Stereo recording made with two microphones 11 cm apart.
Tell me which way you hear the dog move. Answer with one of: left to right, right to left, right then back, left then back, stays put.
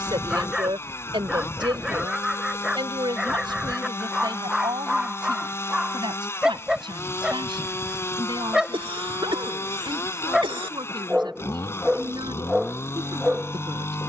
stays put.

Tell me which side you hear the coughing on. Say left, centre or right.
right.